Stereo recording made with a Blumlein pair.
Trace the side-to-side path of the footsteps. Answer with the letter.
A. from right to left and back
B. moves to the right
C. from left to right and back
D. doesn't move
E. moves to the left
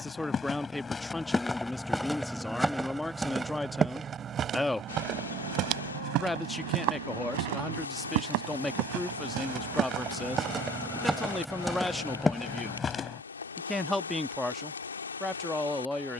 C.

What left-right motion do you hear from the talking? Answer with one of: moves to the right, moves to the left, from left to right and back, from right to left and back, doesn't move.
doesn't move.